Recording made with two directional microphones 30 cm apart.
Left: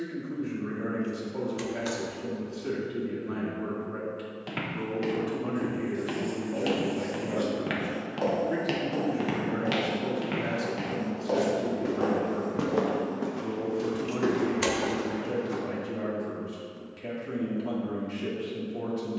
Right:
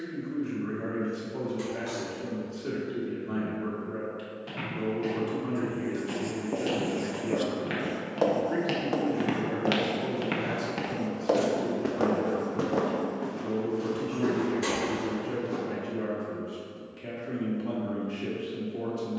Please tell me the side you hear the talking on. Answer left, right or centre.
centre.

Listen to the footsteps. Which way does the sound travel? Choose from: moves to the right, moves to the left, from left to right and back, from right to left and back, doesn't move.
from left to right and back.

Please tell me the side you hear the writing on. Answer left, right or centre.
right.